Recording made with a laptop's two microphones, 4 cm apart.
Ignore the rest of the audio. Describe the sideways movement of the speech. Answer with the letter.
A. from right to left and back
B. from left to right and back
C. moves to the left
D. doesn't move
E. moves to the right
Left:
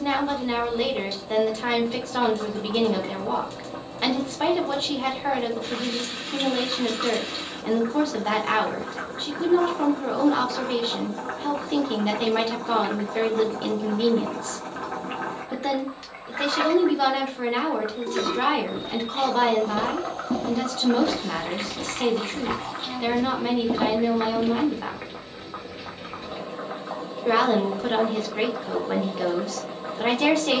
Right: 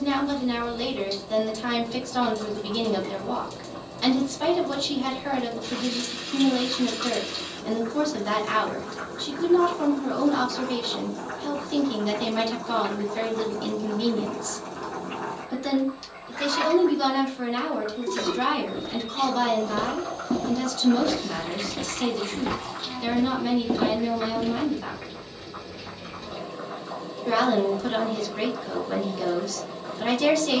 D.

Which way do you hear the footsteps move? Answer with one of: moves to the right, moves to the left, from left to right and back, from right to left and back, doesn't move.
from left to right and back.